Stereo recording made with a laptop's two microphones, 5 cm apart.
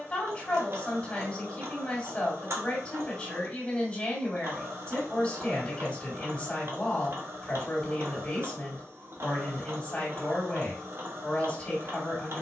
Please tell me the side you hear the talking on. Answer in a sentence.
You can hear the talking on the left.